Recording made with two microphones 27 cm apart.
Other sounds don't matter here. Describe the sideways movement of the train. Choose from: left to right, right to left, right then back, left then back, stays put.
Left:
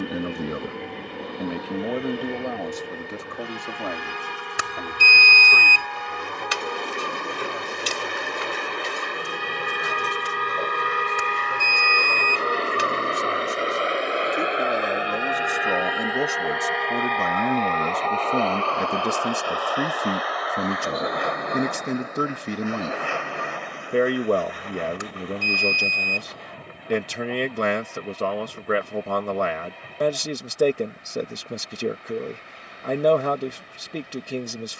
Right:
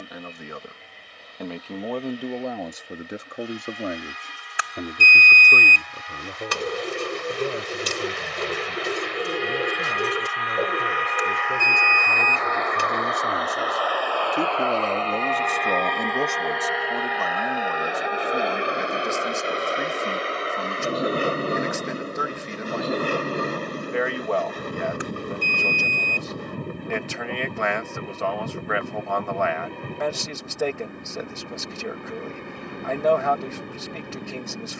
left to right.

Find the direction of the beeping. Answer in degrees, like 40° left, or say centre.
50° left.